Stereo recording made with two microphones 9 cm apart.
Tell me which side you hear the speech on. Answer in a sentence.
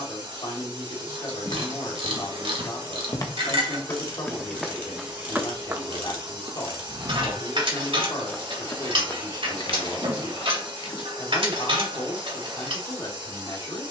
In this clip you hear the speech on the left.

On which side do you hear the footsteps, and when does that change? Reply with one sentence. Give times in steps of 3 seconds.
In this clip you hear the footsteps on the left from 0 s, in the centre from 3 s, on the left from 9 s and not at all from 12 s.